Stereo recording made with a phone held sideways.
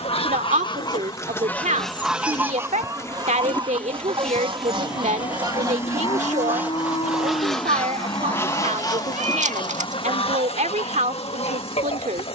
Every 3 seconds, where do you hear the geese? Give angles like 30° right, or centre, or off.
10° left, 40° right, centre, 50° left.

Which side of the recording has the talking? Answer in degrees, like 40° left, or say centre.
80° right.